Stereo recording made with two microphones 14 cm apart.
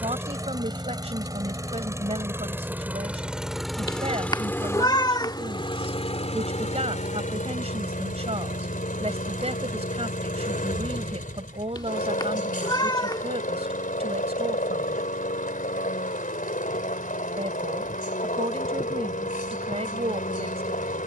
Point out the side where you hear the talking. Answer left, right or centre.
right.